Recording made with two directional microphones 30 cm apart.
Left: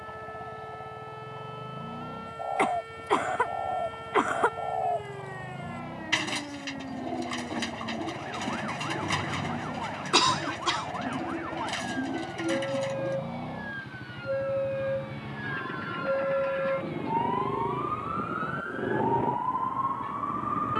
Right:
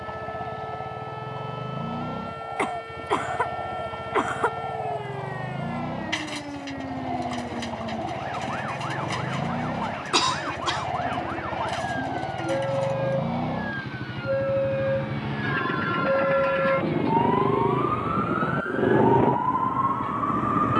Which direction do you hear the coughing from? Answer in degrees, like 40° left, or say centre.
centre.